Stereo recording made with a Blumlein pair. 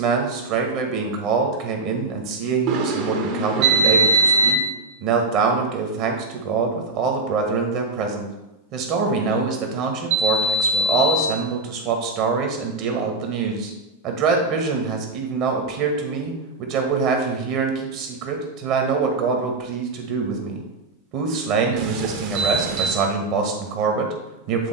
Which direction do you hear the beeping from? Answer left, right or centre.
right.